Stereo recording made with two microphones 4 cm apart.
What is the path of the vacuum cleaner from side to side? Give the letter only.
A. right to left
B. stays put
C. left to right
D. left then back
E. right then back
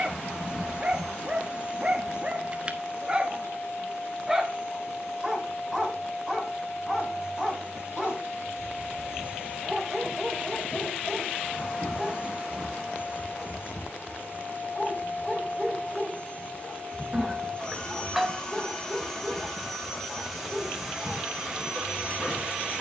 C.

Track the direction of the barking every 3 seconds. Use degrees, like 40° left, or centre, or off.
20° right, 10° right, 10° left, 10° left, 20° left, 20° left, 20° left, 20° left.